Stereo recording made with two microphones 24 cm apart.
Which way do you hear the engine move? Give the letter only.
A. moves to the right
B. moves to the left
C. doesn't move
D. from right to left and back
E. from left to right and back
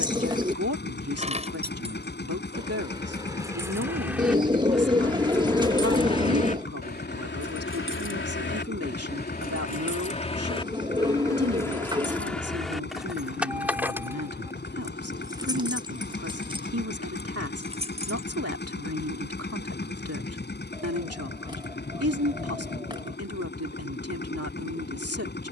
C.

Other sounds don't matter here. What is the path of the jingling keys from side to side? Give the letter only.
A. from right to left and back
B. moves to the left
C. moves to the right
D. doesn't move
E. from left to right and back
A.